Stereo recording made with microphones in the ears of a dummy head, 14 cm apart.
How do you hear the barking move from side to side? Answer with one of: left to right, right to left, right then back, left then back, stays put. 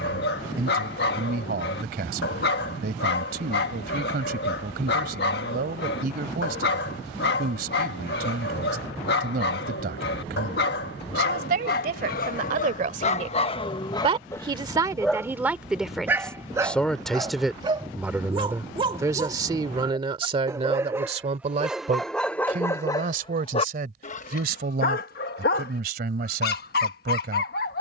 right then back.